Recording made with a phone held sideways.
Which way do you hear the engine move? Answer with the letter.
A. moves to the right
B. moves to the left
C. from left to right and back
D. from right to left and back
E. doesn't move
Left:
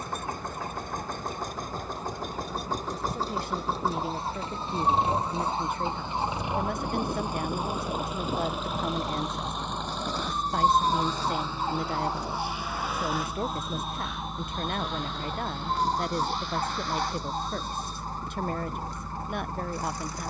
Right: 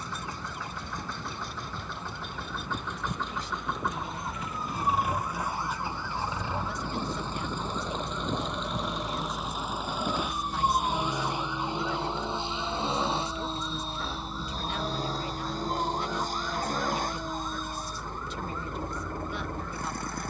A.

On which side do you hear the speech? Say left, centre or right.
left.